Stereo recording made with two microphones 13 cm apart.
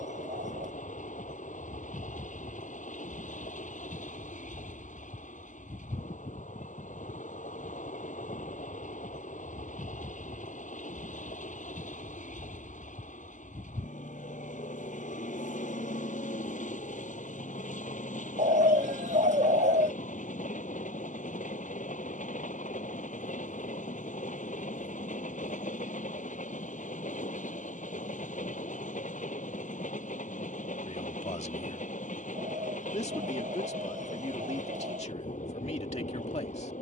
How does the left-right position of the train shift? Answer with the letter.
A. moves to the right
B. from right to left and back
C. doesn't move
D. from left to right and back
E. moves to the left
C.